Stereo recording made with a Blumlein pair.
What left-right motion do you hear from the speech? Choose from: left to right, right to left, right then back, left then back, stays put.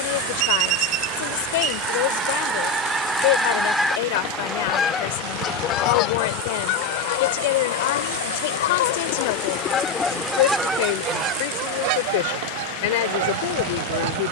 stays put.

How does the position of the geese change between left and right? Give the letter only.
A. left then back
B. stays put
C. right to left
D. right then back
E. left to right
A.